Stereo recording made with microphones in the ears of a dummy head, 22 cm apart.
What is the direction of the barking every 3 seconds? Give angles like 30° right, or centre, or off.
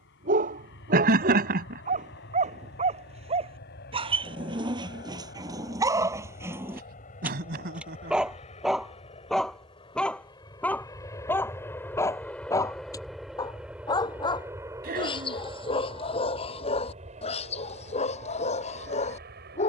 30° right, 20° right, 10° right, 10° left, 20° left, 20° left, 30° left.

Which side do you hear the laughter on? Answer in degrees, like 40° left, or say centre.
40° right.